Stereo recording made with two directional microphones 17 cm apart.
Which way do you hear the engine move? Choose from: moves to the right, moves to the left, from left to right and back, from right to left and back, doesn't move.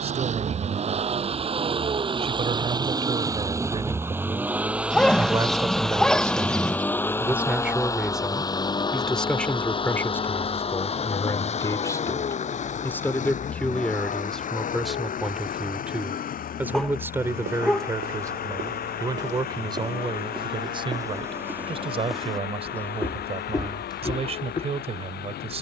moves to the left.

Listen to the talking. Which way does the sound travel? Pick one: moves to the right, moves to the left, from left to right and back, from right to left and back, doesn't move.
from right to left and back.